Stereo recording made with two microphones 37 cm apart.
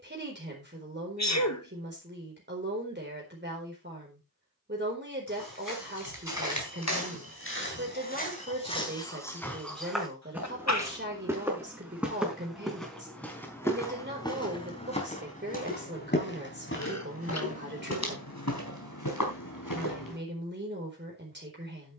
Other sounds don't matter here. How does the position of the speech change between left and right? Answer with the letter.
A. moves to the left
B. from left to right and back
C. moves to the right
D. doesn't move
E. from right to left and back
D.